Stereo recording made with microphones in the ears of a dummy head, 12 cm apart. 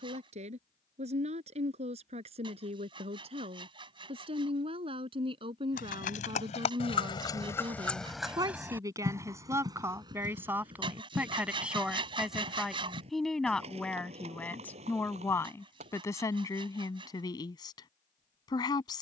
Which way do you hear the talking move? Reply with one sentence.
In this clip you hear the talking move from right to left.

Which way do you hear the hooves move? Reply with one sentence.
In this clip you hear the hooves move from left to right.